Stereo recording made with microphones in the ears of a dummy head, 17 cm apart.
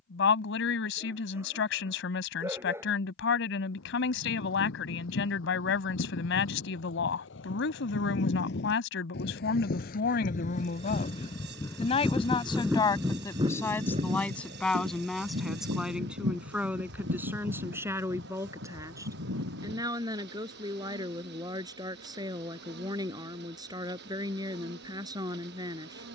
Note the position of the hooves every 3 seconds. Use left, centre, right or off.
off, left, left, left, right, right, right, off, off.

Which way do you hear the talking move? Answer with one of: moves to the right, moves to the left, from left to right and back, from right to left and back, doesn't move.
moves to the right.